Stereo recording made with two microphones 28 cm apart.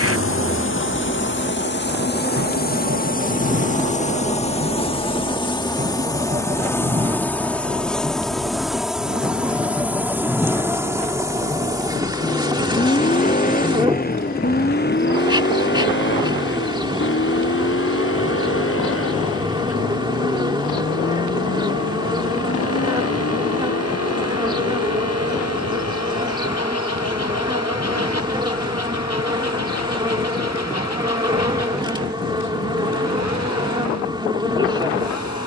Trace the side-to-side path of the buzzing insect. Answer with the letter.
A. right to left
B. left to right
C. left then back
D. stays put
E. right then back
B.